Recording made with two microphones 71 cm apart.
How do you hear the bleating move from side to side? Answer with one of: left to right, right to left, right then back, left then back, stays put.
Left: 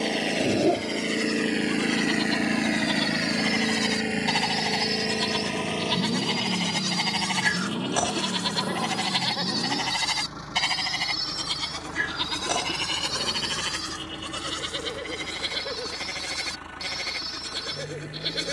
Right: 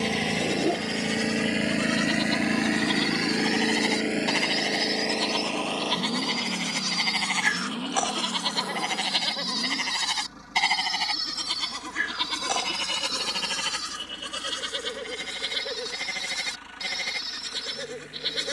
left then back.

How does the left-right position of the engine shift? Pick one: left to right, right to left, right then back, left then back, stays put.
right to left.